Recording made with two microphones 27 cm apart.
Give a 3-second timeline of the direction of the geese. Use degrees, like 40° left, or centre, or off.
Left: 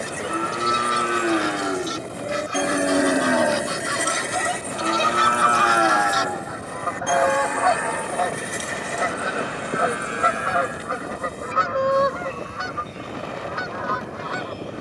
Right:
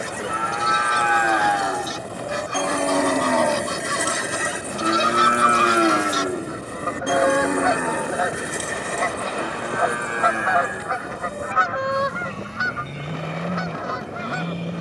60° right, 50° right, 20° right, 30° left, 60° left.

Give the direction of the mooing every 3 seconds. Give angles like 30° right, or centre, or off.
30° left, 10° right, 50° right, 60° right, 70° right.